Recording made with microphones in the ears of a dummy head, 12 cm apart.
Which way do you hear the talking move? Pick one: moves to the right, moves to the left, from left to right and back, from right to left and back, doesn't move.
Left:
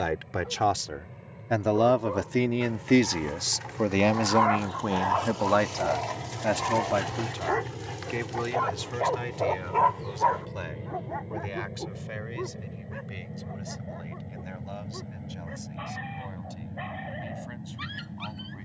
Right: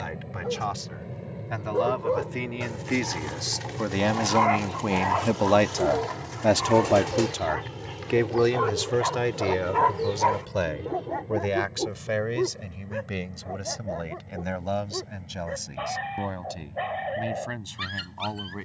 moves to the right.